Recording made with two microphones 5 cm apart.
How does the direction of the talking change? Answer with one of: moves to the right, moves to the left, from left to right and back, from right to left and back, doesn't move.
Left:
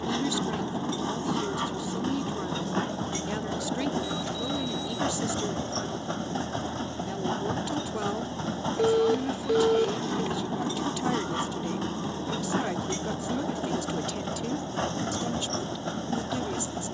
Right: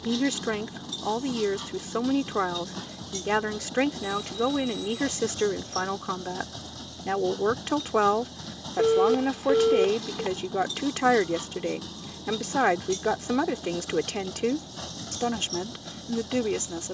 doesn't move.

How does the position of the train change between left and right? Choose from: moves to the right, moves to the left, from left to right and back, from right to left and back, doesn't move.
doesn't move.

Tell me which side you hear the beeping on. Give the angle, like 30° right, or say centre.
20° right.